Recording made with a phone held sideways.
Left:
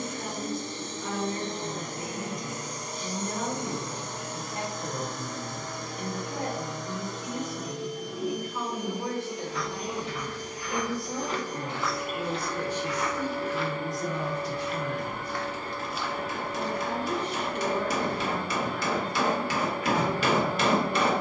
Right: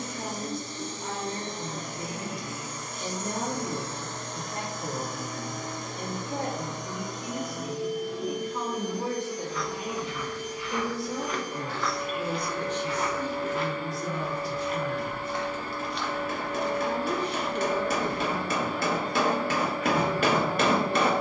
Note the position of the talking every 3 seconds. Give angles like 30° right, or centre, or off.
40° right, 40° right, 30° right, 10° right, 20° left, 10° right, 30° right.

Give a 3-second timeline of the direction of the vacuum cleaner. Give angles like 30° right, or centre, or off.
50° left, centre, 10° right, 40° left, 50° left, 50° left, 50° left.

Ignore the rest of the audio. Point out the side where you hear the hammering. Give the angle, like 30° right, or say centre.
50° right.